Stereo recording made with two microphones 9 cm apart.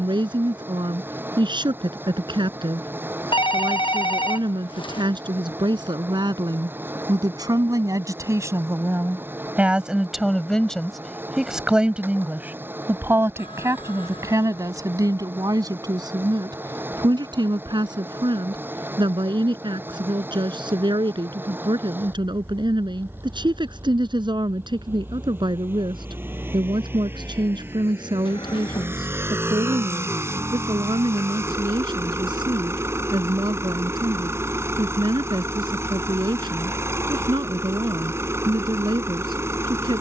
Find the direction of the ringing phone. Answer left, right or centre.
left.